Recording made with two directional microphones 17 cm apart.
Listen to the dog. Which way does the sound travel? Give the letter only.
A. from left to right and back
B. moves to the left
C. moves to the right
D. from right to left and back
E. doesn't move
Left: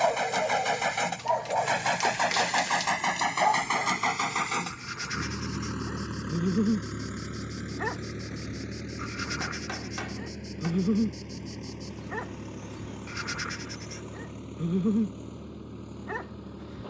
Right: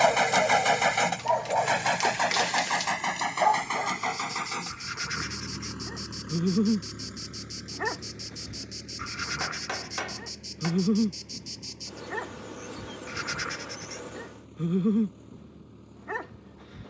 E.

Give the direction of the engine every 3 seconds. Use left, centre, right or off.
centre, left, left, left, left, left.